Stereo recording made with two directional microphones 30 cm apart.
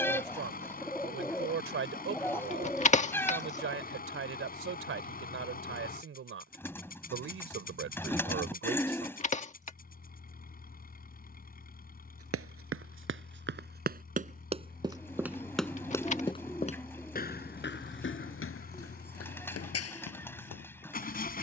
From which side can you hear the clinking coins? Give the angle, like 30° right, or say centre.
20° left.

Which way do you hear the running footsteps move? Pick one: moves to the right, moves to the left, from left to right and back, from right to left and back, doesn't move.
moves to the left.